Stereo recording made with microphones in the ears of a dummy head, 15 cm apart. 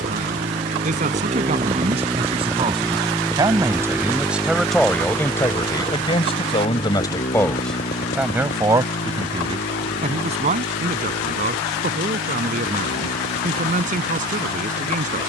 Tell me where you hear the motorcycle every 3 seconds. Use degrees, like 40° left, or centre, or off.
30° right, 10° left, 40° left, 50° left, 60° left.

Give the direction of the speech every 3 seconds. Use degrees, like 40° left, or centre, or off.
40° right, centre, 10° left, 40° right, 50° right.